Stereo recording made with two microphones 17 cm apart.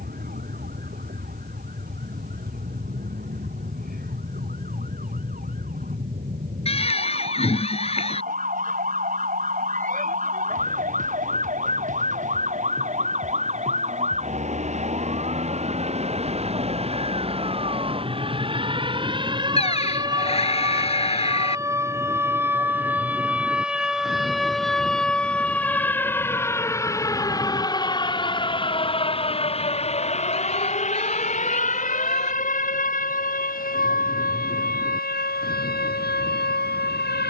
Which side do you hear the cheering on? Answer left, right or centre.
left.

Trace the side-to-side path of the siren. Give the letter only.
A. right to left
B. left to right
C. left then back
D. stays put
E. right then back
A.